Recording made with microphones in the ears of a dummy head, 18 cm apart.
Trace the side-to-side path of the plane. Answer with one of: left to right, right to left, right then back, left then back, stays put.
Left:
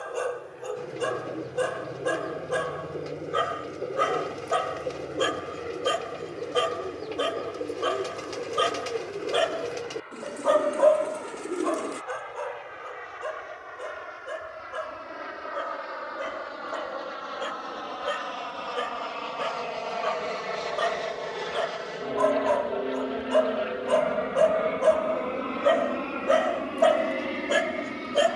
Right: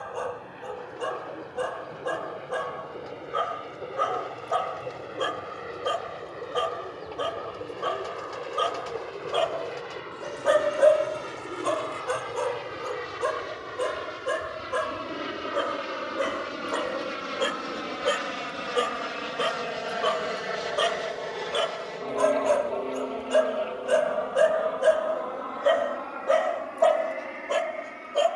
right to left.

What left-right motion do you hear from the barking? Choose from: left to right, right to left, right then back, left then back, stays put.
right then back.